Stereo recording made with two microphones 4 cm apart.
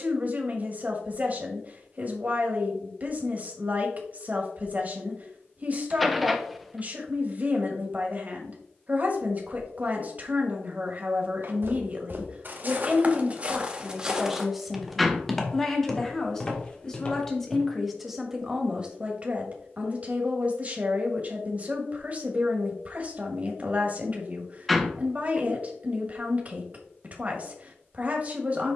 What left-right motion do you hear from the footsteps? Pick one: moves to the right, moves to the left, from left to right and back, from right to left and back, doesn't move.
moves to the left.